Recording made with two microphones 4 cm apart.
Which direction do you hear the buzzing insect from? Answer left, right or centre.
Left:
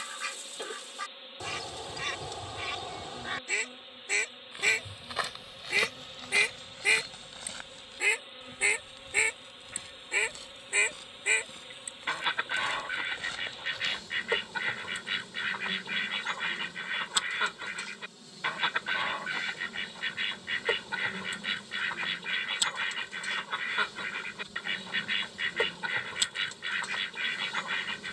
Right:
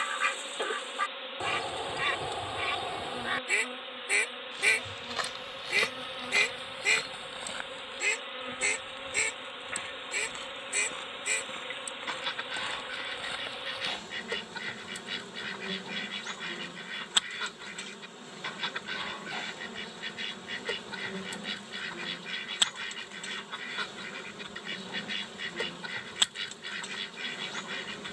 right.